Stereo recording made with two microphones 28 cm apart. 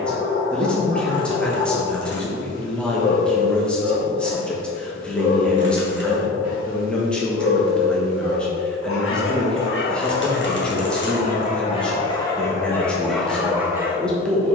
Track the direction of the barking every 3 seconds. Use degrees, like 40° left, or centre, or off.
70° left, 70° left, 60° left, 40° left, centre.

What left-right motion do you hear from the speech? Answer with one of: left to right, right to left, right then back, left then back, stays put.
stays put.